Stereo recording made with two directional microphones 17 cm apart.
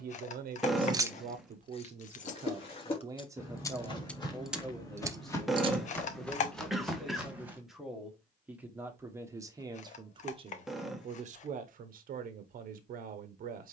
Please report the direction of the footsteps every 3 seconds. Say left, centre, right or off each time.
left, left, centre, off, off.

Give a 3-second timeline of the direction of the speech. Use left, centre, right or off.
right, centre, centre, right, right.